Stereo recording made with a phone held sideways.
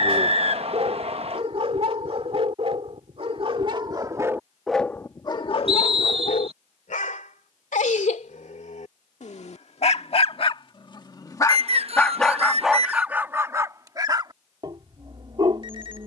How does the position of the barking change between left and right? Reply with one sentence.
In this clip you hear the barking go left and come back.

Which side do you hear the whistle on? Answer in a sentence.
In this clip you hear the whistle on the right.